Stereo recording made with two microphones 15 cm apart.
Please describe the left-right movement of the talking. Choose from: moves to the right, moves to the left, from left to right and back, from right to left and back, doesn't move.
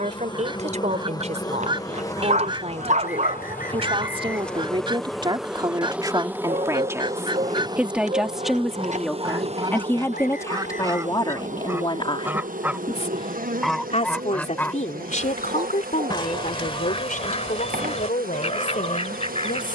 moves to the left.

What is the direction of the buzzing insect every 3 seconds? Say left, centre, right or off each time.
left, centre, right, right, right, right, right.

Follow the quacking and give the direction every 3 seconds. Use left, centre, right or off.
right, right, right, right, centre, left, left.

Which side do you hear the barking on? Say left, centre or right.
right.